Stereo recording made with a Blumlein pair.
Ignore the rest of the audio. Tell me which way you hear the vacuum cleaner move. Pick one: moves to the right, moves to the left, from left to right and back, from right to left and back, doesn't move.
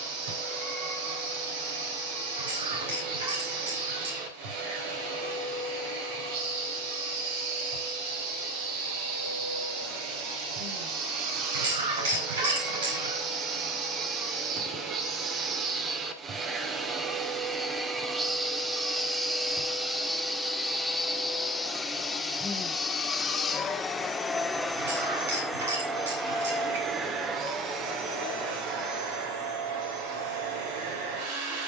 from right to left and back.